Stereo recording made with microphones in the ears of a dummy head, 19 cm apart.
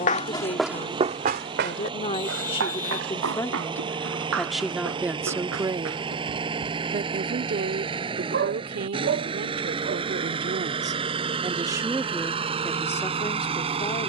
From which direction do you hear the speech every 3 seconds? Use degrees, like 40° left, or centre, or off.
30° left, centre, 50° right, 40° right, 10° left.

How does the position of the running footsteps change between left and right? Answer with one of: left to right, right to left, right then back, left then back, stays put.
left to right.